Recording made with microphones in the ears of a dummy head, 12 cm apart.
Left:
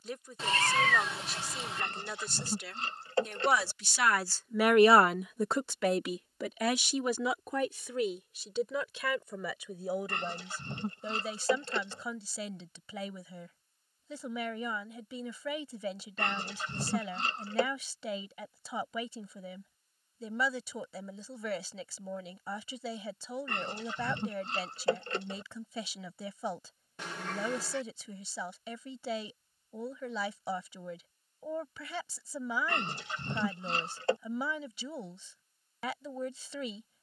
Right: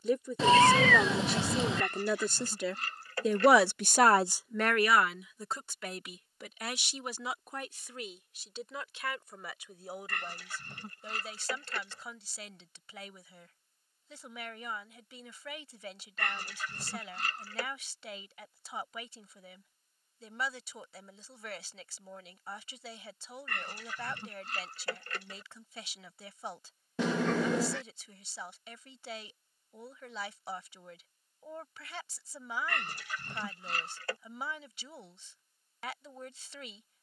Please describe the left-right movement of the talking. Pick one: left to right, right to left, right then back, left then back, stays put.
right to left.